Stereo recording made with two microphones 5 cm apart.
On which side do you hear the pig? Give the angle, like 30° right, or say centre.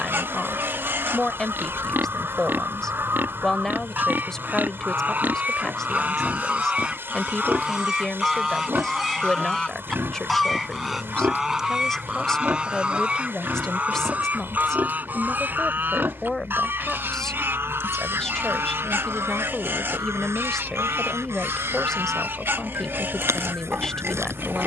40° right.